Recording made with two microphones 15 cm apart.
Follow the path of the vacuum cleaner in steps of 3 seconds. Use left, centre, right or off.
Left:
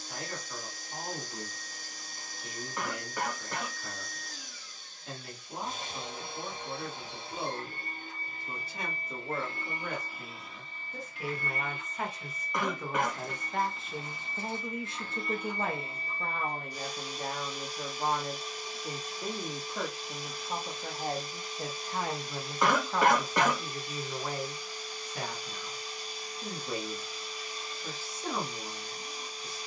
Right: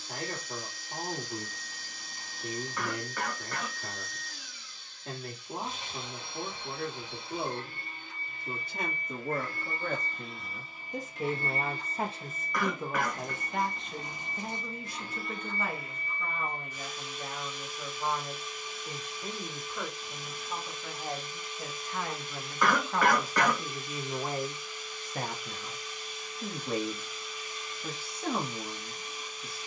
left, left, left, centre, right, left, left, left, left, left.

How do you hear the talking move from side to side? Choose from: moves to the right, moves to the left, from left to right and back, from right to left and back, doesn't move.
from right to left and back.